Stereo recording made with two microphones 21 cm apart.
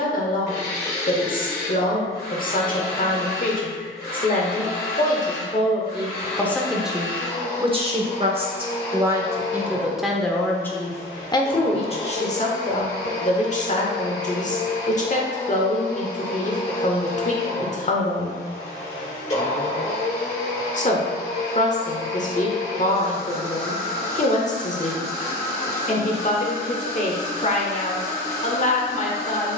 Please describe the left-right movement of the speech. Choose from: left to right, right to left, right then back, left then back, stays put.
right then back.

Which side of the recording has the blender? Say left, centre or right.
left.